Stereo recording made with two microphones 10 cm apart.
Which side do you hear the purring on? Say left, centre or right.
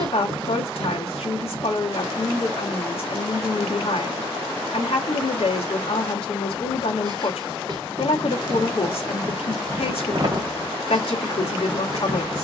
right.